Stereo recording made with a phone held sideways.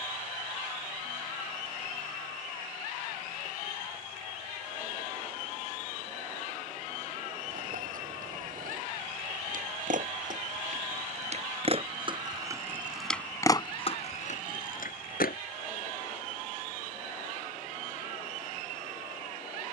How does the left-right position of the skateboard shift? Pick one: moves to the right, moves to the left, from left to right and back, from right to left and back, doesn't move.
moves to the left.